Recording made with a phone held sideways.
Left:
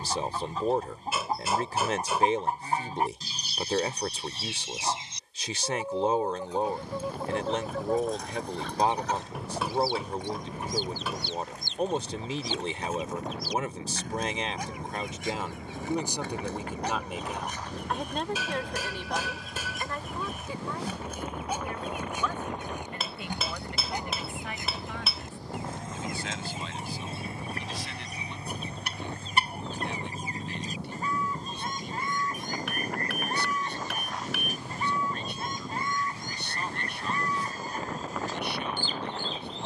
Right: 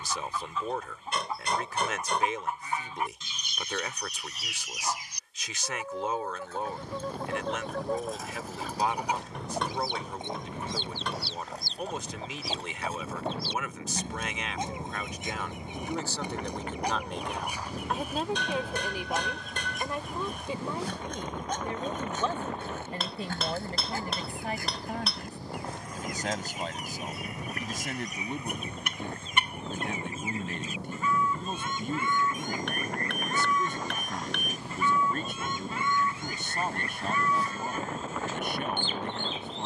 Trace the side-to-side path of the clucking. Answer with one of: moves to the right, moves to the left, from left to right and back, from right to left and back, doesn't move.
from left to right and back.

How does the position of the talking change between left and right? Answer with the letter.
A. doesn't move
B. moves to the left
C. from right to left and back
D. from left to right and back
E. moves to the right
E.